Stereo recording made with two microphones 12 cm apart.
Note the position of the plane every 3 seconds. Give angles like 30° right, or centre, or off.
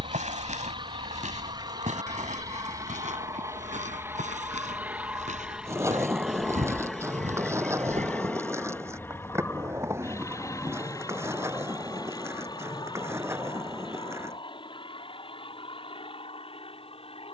40° right, 20° right, 10° left, 20° left, 40° left, 40° left.